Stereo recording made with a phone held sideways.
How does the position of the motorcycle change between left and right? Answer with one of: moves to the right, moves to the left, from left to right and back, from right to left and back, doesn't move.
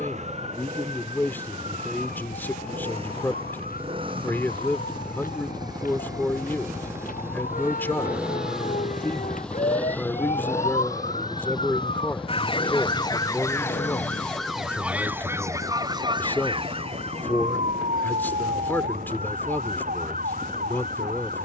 moves to the left.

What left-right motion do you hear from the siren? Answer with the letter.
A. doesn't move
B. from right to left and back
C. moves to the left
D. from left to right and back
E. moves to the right
E.